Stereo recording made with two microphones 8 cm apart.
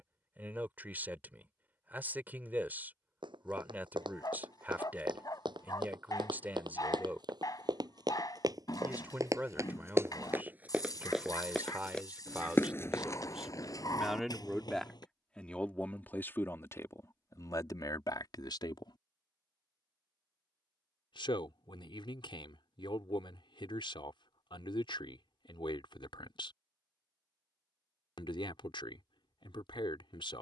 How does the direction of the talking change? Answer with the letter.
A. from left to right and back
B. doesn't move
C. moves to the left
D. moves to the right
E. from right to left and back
C.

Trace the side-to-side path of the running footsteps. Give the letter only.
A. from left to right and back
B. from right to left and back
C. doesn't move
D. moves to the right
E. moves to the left
E.